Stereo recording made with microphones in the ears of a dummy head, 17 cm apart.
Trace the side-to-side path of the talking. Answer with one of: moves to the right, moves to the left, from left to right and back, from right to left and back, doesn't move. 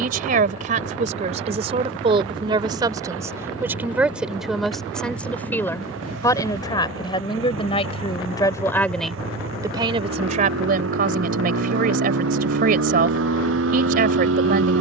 from right to left and back.